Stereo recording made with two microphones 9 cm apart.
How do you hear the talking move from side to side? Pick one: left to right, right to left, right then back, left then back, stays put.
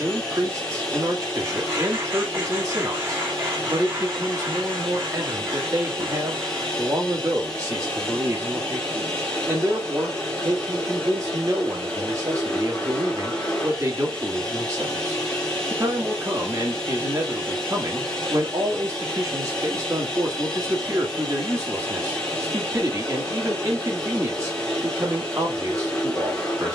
stays put.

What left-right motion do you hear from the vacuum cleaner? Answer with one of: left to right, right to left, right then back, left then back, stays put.
stays put.